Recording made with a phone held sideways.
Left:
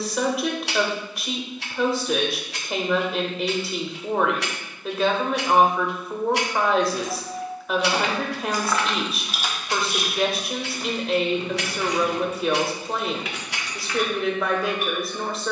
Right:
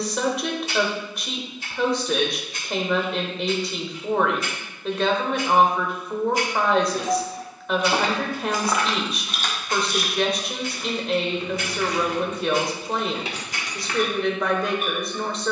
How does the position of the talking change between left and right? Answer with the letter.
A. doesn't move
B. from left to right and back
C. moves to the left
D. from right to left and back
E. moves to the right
A.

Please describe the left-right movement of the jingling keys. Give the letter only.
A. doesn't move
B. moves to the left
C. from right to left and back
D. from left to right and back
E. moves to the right
C.